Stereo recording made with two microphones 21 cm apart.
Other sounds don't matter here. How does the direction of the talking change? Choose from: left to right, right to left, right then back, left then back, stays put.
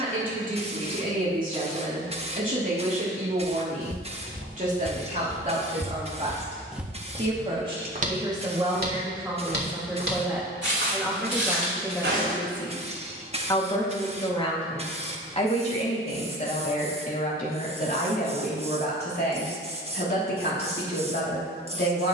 right to left.